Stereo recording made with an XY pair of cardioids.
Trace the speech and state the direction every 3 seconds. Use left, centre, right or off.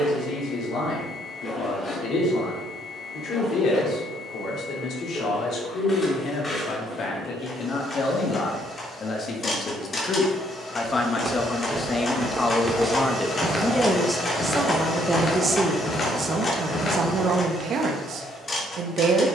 left, left, left, left, centre, right, right.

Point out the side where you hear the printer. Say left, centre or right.
left.